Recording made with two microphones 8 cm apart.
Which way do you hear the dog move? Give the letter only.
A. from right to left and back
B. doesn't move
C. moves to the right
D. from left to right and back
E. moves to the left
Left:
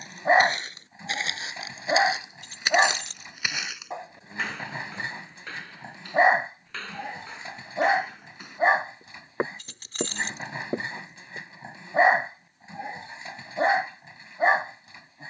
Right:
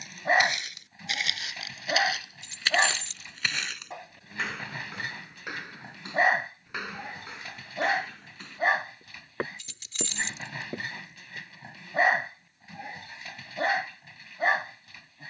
B.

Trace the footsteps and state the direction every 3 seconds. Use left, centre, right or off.
left, centre, centre, left, off.